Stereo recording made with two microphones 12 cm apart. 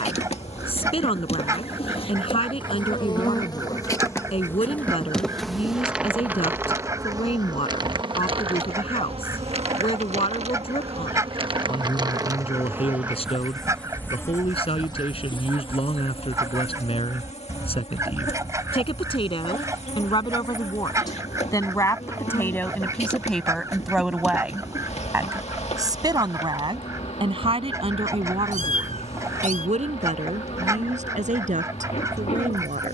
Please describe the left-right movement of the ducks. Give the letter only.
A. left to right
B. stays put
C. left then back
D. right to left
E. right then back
B.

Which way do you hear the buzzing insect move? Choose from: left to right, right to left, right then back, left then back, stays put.
right then back.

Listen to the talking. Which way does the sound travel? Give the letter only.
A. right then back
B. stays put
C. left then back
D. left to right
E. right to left
D.